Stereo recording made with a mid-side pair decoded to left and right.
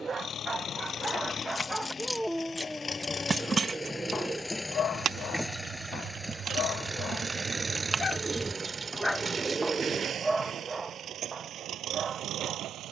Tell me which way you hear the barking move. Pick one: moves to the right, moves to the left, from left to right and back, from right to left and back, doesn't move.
from right to left and back.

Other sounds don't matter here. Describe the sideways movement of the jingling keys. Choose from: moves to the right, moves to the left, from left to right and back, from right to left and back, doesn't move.
from left to right and back.